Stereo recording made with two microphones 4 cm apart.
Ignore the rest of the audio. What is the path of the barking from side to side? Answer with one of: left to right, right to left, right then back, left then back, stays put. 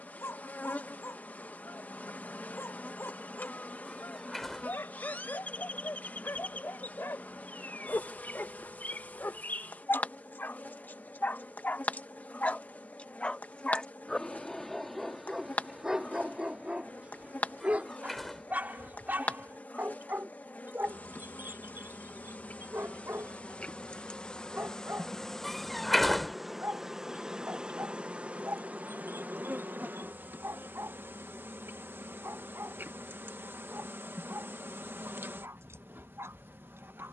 left to right.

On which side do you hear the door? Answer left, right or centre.
centre.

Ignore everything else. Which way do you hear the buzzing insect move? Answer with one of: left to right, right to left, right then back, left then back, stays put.
left to right.